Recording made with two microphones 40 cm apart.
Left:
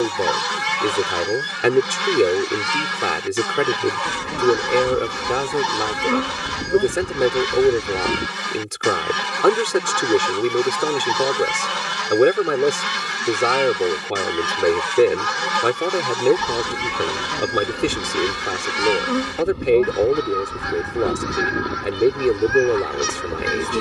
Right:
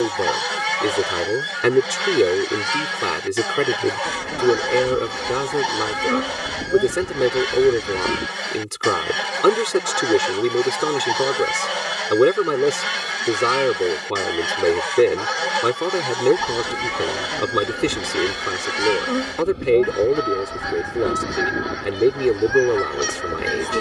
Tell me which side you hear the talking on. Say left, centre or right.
centre.